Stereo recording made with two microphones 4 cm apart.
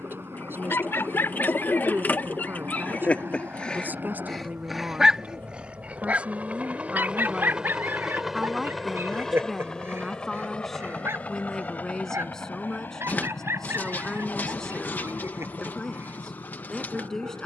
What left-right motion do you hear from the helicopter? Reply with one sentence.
You can hear the helicopter go from the right side to the left.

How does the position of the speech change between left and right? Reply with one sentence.
You can hear the speech move from right to left.